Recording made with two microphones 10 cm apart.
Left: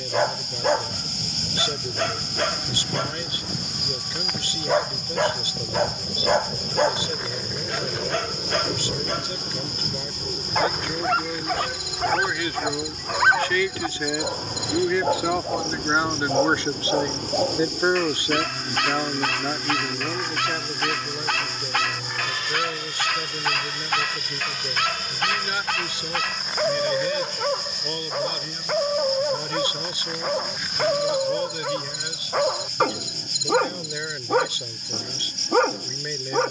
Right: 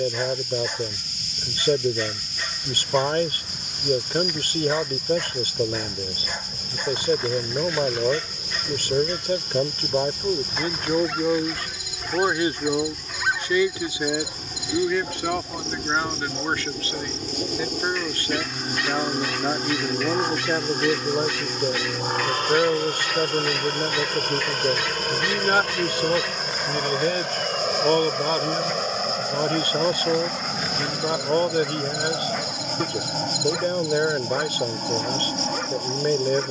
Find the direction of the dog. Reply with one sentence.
You can hear the dog on the left.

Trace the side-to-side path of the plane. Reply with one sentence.
In this clip you hear the plane go from the left side to the right.